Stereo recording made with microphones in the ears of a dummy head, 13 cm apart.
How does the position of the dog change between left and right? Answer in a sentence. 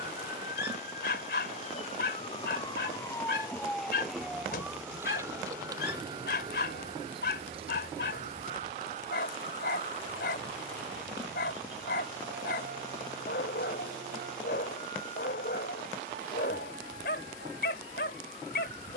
In this clip you hear the dog stay in one place.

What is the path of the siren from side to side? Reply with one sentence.
In this clip you hear the siren move from left to right.